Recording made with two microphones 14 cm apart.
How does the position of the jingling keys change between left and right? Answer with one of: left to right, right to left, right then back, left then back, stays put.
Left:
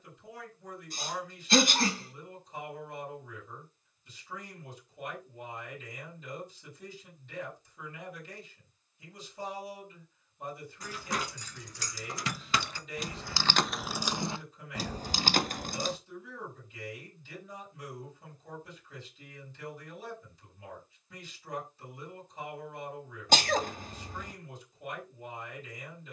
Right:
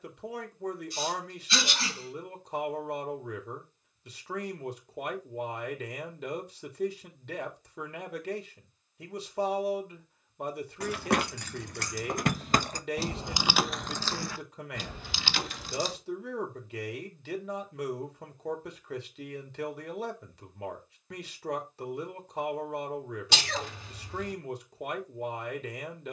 right to left.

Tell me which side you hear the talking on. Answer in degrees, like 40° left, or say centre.
80° right.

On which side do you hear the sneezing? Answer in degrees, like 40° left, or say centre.
50° left.